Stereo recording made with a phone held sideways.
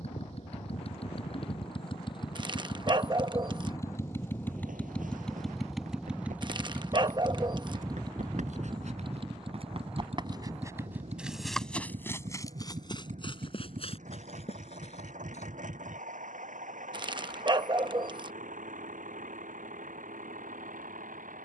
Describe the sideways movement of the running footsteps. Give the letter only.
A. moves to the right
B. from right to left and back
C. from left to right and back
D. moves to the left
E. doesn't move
D.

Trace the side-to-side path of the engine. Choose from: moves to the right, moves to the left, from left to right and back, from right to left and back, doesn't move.
moves to the right.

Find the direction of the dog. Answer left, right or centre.
right.